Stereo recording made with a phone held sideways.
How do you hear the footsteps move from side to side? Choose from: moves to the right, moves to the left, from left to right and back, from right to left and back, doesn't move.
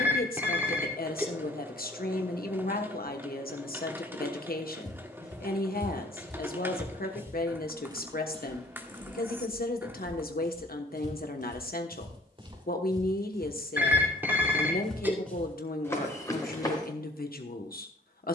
from left to right and back.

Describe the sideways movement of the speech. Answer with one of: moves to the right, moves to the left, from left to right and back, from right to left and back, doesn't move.
doesn't move.